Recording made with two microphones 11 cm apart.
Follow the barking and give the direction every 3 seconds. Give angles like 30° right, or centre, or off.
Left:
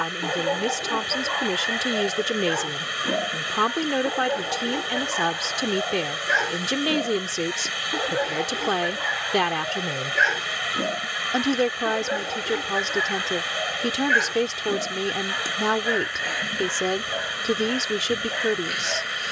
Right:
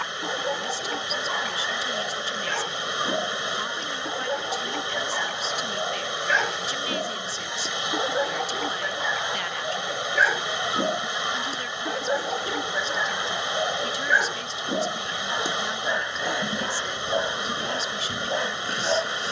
10° left, centre, centre, 10° right, 10° right, 20° right, 30° right.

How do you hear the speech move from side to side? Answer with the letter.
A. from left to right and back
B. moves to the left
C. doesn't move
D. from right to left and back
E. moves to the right
C.